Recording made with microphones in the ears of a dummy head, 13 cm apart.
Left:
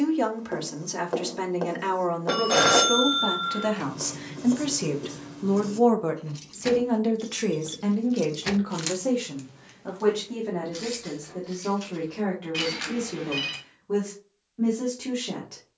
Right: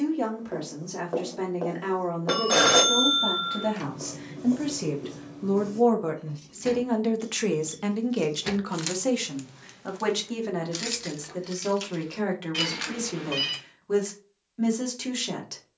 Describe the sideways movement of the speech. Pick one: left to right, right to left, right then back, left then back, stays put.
left to right.